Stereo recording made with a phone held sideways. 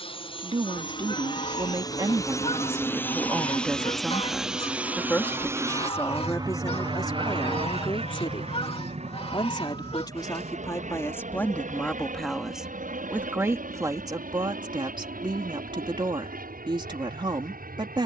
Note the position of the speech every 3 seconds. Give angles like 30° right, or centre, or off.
30° right, centre, 30° left, 20° left, 20° right, 30° right.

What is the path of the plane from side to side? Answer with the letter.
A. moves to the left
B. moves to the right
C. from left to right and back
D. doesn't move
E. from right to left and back
B.